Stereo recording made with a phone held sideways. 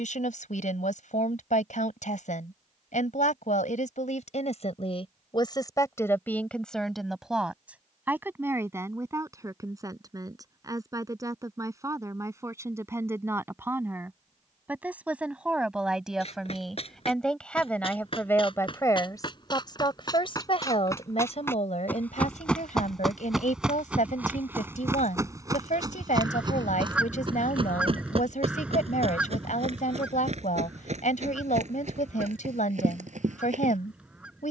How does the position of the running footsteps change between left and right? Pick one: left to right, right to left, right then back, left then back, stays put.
left to right.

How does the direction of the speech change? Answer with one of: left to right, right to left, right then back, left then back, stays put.
right then back.